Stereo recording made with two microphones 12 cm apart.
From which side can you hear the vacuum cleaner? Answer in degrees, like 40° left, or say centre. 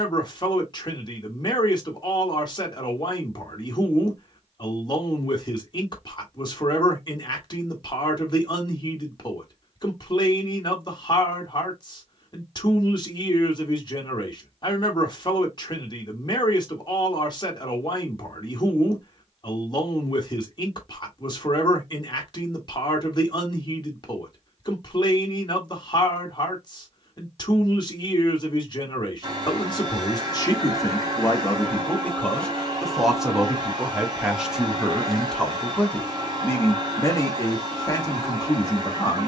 40° right.